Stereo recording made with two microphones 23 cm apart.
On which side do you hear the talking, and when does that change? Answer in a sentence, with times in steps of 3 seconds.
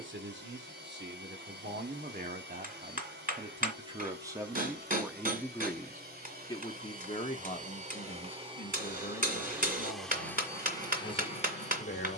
In this clip you hear the talking on the right from 0 s, in the centre from 3 s and on the left from 6 s.